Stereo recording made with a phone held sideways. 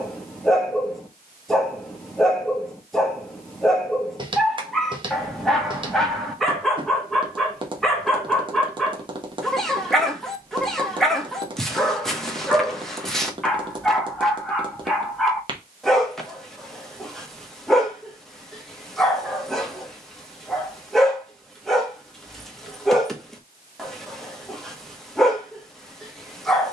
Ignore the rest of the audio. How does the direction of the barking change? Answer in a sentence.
You can hear the barking stay put.